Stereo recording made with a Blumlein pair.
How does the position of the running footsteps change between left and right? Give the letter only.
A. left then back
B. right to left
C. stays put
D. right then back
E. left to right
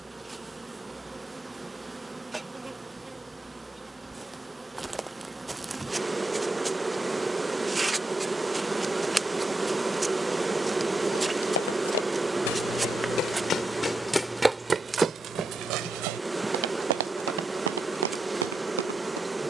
E.